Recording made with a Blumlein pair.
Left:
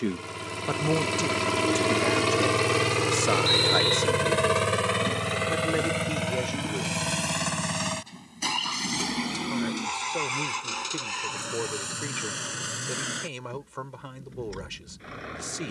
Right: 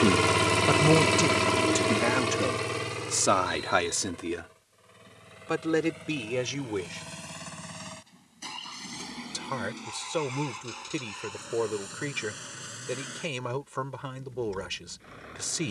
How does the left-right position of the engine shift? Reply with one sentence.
In this clip you hear the engine go from the right side to the left.